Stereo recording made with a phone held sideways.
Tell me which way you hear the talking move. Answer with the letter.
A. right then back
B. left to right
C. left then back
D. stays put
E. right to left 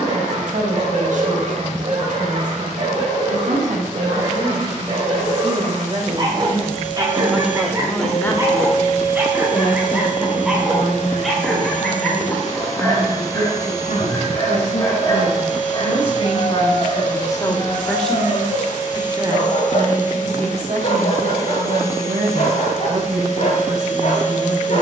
C.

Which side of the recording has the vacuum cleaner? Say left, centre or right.
left.